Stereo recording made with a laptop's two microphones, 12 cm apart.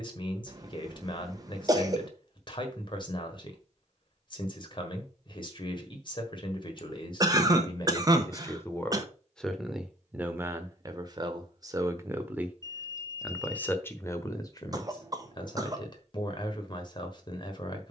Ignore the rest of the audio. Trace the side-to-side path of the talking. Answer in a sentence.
You can hear the talking move from left to right and back again.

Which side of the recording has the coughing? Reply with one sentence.
In this clip you hear the coughing on the right.